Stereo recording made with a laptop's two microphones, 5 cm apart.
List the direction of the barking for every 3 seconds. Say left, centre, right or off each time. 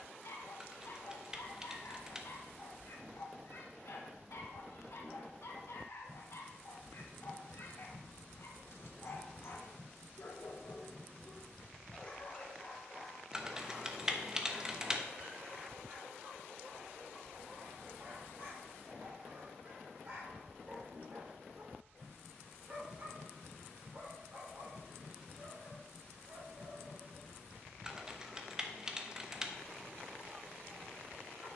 left, left, left, left, centre, right, right, right, right, right, right.